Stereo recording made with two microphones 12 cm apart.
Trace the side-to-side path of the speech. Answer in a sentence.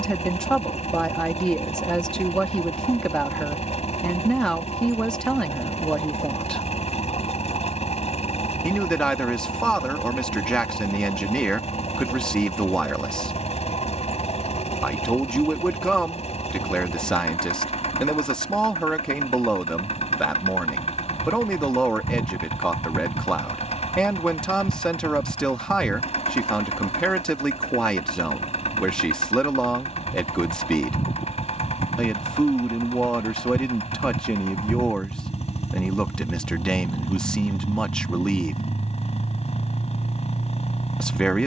You can hear the speech stay put.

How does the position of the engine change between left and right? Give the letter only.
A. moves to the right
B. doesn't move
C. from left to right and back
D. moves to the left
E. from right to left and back
B.